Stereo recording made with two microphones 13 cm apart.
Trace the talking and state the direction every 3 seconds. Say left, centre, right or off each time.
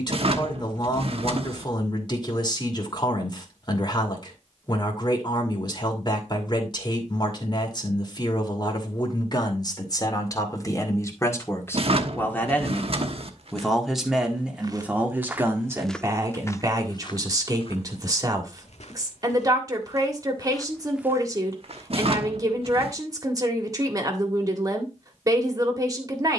left, left, left, left, centre, right, right, right, right.